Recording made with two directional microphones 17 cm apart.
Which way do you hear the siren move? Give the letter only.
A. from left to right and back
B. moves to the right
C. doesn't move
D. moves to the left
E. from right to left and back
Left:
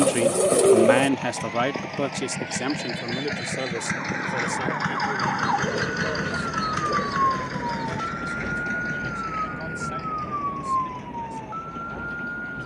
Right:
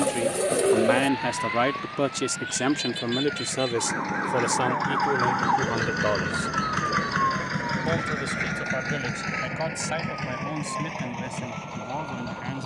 D.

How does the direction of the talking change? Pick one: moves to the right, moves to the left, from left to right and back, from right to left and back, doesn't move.
moves to the right.